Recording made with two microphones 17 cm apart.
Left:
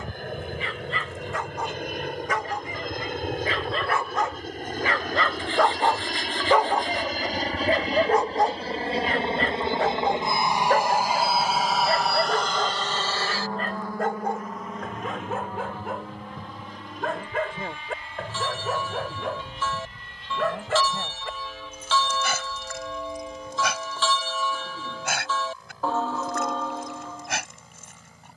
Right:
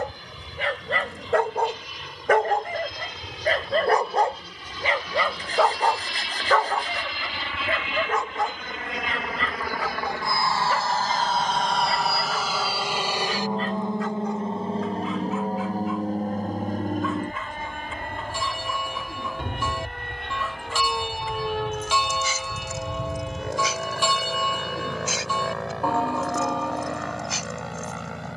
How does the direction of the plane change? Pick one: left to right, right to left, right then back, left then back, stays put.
left to right.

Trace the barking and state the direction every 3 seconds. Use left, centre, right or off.
right, right, left, left, left, left, left, left, left, left.